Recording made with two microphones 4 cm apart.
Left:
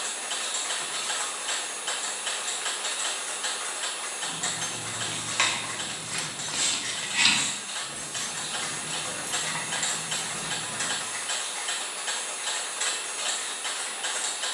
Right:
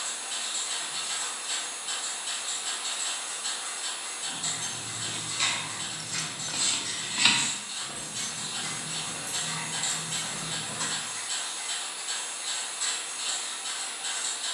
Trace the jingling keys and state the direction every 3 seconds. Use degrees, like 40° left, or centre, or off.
off, 50° left, 20° right, 50° right, off.